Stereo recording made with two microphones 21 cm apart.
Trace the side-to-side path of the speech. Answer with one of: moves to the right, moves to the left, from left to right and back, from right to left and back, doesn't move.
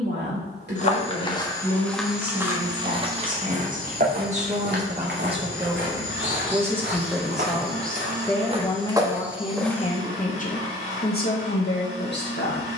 moves to the left.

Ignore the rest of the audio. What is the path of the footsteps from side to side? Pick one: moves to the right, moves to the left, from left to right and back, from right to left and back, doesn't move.
from left to right and back.